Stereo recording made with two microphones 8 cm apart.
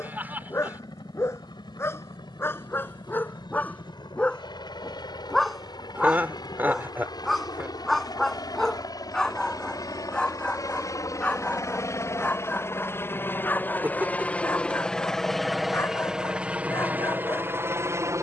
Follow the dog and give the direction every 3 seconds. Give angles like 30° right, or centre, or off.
30° left, 10° left, centre, 10° left, 20° left, 30° left.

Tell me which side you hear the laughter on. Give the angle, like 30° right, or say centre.
20° right.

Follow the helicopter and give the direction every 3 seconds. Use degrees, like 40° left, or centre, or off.
60° left, 60° left, 60° left, 40° left, 20° left, 10° right.